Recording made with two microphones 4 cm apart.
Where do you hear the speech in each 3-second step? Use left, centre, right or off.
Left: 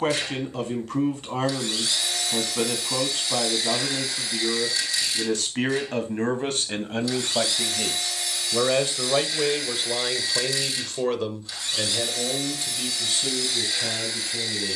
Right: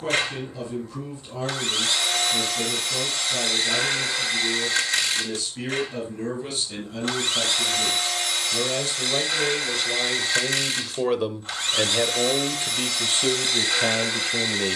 left, left, left, centre, right.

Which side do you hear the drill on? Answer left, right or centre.
right.